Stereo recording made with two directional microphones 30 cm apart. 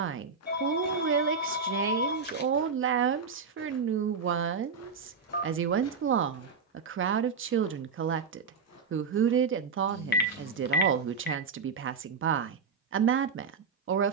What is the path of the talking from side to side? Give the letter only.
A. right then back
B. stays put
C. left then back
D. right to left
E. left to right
B.